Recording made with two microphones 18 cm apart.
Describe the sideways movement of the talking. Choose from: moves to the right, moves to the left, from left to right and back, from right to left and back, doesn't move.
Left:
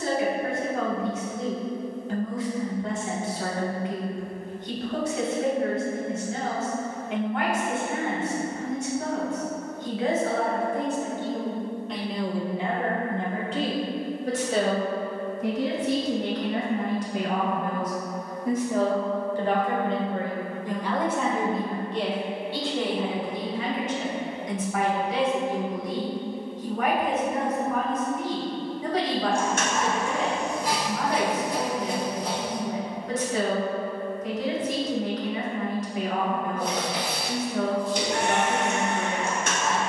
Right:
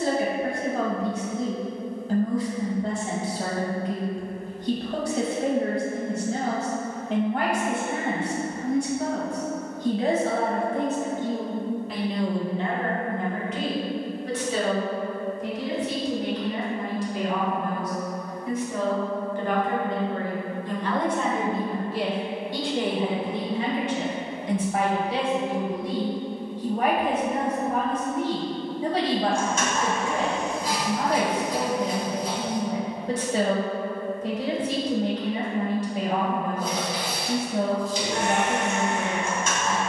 from right to left and back.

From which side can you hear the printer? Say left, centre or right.
left.